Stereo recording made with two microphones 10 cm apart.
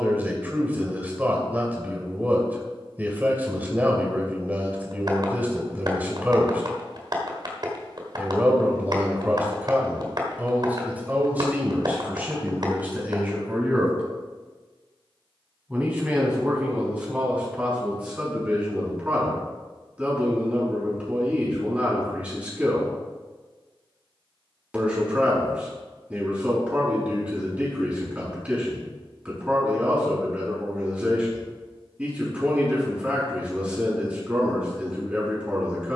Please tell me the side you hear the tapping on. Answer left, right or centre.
right.